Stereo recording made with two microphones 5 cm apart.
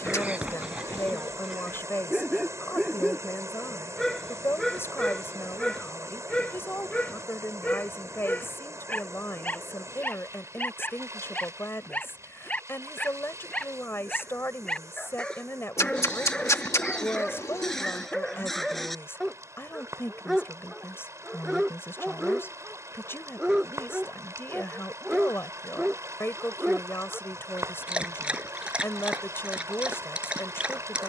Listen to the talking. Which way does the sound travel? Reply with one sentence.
You can hear the talking stay in one place.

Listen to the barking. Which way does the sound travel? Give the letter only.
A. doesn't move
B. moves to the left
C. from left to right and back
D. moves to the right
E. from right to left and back
E.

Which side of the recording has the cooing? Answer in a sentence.
You can hear the cooing on the left.